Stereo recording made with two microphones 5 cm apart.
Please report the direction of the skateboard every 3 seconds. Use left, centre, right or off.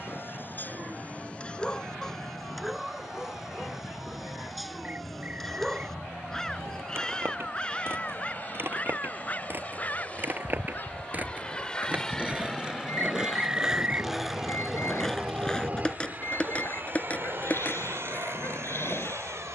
off, off, right, right, centre, left, left.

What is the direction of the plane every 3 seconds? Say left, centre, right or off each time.
left, left, left, left, centre, right, right.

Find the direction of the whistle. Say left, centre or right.
right.